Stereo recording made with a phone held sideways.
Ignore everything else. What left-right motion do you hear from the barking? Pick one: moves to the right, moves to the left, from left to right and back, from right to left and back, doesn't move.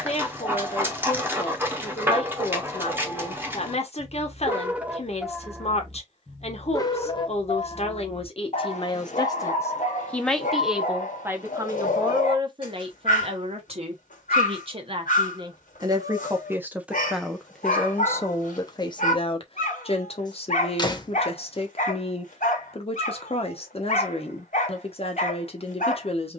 moves to the left.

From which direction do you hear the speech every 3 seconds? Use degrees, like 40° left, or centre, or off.
50° left, 50° left, 50° left, centre, 40° right, 10° right, 40° left, 50° left, 50° left.